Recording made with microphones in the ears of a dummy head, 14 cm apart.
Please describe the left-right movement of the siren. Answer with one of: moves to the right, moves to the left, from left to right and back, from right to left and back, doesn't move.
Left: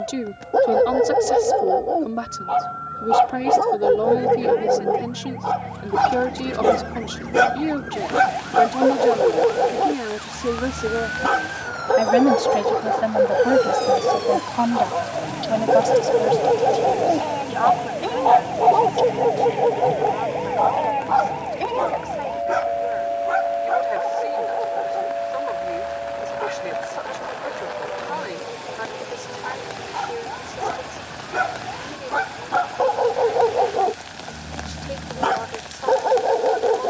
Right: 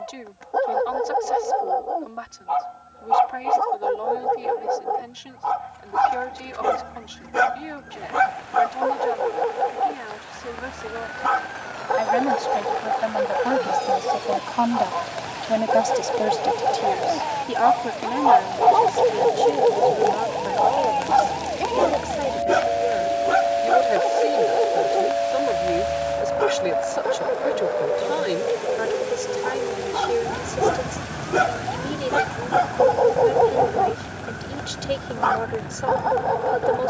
moves to the right.